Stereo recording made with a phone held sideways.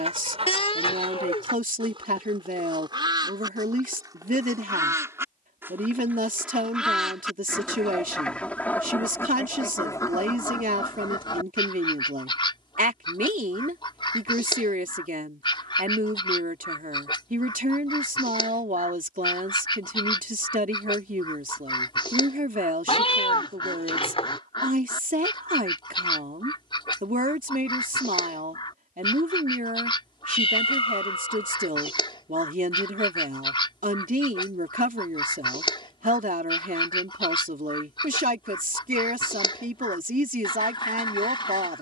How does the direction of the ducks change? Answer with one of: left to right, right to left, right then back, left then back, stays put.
right to left.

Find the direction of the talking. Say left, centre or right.
right.